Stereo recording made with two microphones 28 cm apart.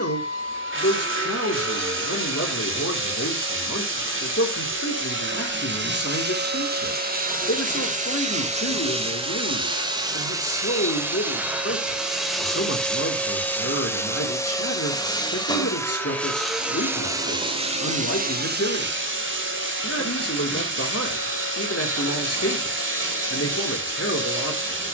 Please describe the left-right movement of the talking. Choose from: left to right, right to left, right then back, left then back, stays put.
stays put.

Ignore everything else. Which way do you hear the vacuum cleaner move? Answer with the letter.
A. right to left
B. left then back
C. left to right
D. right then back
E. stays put
B.